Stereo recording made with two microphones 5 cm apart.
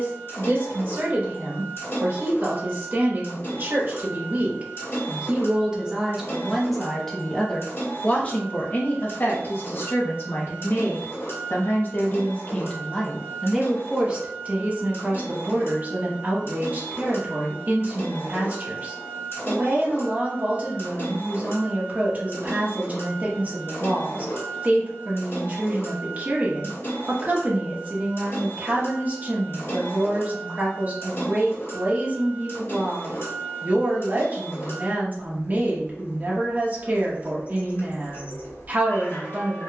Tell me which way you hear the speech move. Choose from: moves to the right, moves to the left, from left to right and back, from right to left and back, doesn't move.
from right to left and back.